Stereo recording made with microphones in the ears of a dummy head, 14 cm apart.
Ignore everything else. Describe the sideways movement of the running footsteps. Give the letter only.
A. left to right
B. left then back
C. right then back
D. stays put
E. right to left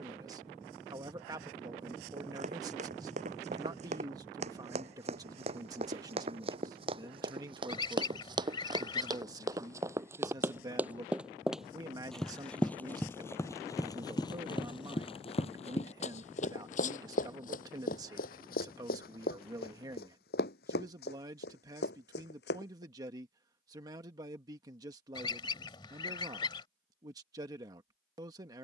E.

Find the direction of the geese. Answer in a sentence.
In this clip you hear the geese on the left.